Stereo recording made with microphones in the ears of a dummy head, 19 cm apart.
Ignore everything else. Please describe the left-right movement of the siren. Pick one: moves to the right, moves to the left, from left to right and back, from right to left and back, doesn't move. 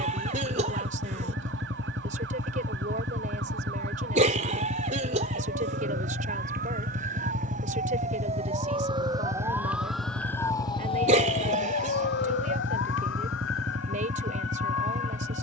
moves to the left.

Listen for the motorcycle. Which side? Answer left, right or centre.
right.